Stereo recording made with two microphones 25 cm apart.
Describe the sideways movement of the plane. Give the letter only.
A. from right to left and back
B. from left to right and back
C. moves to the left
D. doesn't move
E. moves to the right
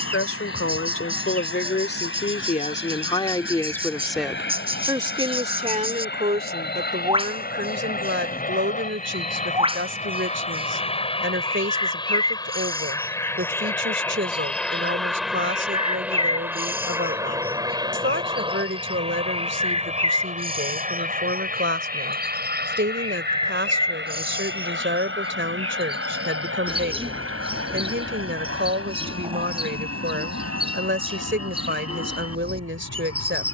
E.